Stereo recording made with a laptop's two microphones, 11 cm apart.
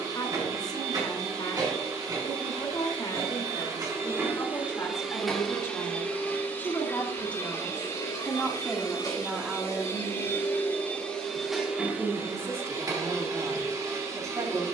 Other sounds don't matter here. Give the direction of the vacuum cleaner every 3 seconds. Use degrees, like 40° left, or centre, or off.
30° right, 10° right, 30° left, 20° left, 30° right.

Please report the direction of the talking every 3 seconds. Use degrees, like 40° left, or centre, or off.
40° left, 30° left, 10° left, 10° right, 30° right.